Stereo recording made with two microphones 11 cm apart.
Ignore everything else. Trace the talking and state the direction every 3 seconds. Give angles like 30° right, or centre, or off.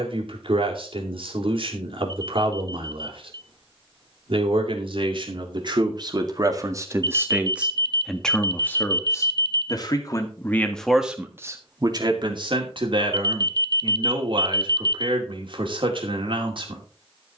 60° right, 60° right, 10° right, 10° left, 50° right, 60° right.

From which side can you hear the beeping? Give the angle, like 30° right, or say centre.
40° right.